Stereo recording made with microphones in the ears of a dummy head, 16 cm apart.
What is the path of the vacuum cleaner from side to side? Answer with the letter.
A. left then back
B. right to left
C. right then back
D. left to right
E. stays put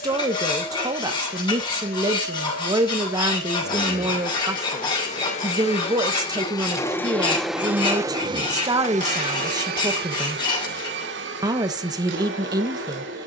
D.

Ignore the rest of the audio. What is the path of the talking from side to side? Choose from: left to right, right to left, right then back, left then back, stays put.
stays put.